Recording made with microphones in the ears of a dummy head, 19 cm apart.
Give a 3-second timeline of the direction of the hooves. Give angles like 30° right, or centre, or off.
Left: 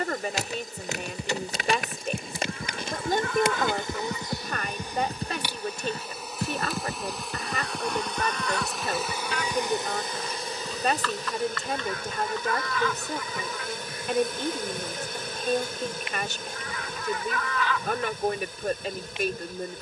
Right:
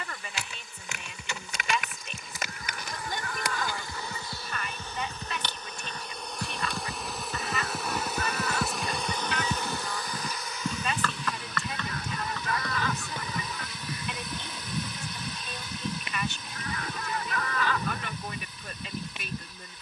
50° left, 40° left, centre, 30° right, 60° right, 70° right, 80° right.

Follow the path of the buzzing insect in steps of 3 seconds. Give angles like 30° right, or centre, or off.
30° left, 20° left, centre, 30° left, 40° left, 40° left, 40° left.